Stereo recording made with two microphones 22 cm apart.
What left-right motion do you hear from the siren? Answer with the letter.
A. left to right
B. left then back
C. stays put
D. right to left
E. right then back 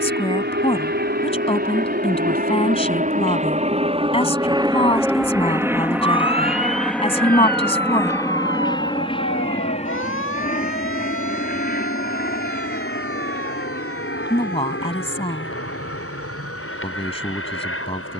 D.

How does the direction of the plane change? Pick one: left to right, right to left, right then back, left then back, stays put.
right to left.